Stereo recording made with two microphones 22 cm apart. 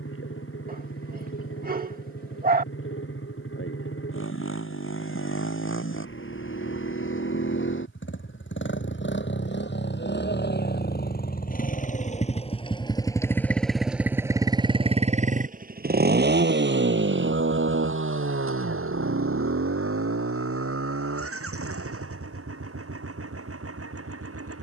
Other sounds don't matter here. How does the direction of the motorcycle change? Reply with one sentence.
In this clip you hear the motorcycle move from left to right.